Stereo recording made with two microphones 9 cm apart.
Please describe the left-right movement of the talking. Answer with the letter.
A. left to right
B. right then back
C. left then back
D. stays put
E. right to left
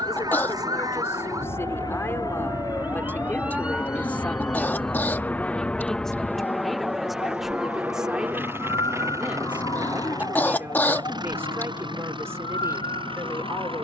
A.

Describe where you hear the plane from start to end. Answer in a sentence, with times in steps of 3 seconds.
In this clip you hear the plane on the left from 0 s, in the centre from 6 s and on the right from 9 s.